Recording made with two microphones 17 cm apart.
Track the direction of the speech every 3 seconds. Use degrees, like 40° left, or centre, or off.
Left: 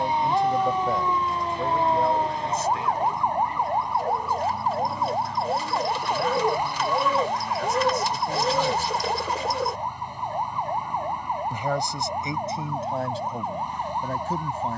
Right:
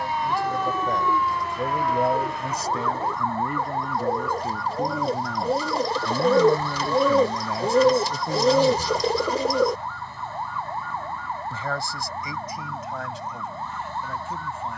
10° right, 60° right, 30° right, 20° left, 30° left.